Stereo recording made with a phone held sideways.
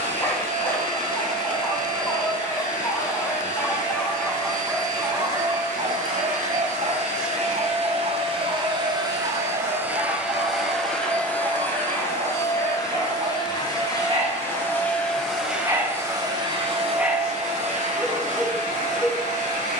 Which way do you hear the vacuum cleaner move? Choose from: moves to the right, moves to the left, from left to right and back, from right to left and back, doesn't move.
from right to left and back.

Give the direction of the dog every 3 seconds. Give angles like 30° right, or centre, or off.
20° left, 10° right, 70° right, 70° right, 50° right, 20° right, centre.